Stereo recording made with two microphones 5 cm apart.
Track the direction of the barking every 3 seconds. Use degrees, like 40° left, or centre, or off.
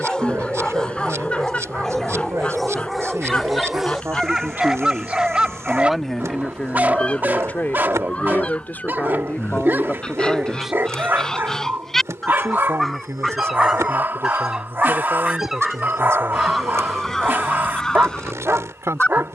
10° left, 10° right, 40° right, 40° right, 40° right, 40° right, 40° right.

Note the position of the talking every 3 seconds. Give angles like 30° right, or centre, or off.
80° right, 50° right, 30° left, 10° left, 70° right, 70° right, 70° right.